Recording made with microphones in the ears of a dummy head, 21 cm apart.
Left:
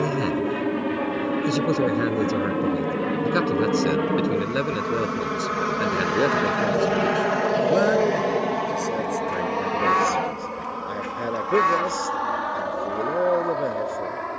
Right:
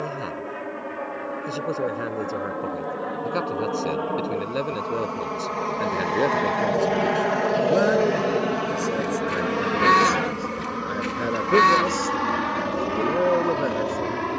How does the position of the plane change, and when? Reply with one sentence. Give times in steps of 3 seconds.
You can hear the plane on the left from 0 s, in the centre from 6 s and on the right from 9 s.